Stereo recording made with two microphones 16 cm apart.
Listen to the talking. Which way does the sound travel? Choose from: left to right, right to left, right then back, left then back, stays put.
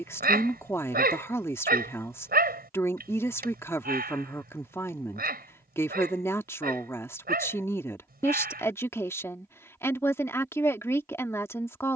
stays put.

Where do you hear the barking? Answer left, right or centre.
right.